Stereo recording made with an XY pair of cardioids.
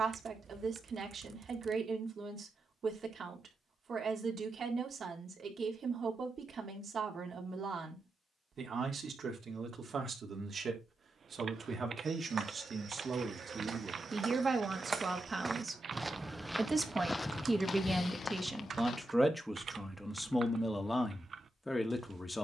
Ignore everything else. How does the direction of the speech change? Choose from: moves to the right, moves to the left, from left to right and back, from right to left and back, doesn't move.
moves to the left.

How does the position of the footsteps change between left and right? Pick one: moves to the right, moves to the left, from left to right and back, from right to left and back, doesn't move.
moves to the left.